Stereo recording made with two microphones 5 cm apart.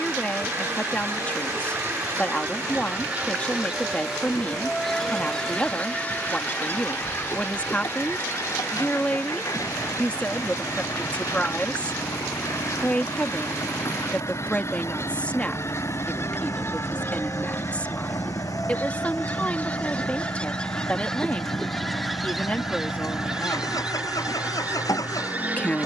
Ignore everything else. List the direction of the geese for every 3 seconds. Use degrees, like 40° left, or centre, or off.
40° right, centre, 40° left, 60° left, 60° left, 50° left, 30° left, centre, 30° right.